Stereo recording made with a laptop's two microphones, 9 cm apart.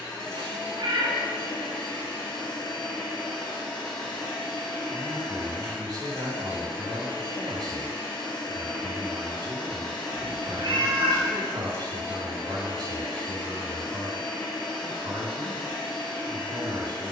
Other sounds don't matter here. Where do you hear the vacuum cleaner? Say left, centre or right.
left.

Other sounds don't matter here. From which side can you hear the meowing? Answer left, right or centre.
right.